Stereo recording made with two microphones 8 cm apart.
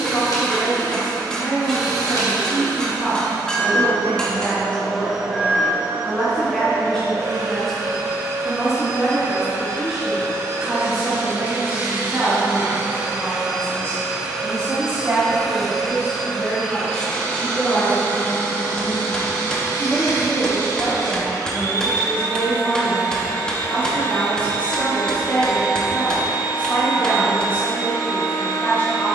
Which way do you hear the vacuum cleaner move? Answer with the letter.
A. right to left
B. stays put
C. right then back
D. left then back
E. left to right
C.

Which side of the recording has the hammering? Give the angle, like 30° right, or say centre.
10° left.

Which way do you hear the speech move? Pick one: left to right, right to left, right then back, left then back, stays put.
right then back.